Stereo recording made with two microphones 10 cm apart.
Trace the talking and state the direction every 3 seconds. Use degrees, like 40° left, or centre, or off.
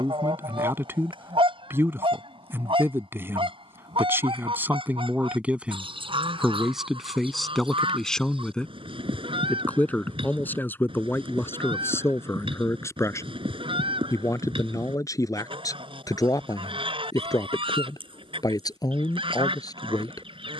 20° right, 20° right, centre, 20° left, 30° left, 40° left, 40° left.